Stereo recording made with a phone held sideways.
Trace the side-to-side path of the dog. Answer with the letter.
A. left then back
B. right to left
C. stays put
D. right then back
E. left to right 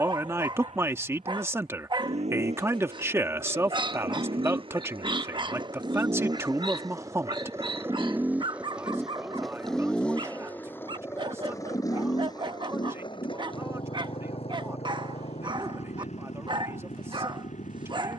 C.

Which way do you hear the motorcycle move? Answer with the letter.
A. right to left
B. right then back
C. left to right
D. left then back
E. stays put
A.